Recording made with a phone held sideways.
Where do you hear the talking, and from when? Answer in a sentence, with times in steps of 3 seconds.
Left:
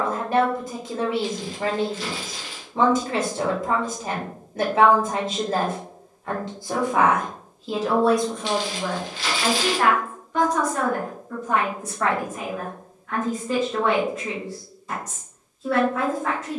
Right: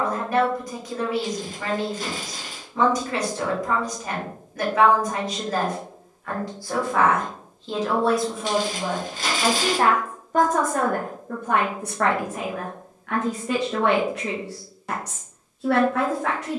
You can hear the talking on the left from 0 s, in the centre from 6 s and on the right from 9 s.